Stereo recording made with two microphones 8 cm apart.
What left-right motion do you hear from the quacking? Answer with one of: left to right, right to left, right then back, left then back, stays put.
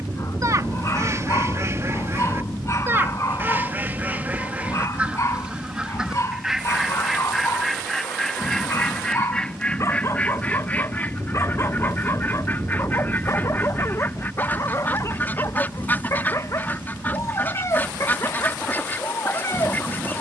right to left.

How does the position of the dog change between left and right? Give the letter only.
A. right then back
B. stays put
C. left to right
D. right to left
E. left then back
B.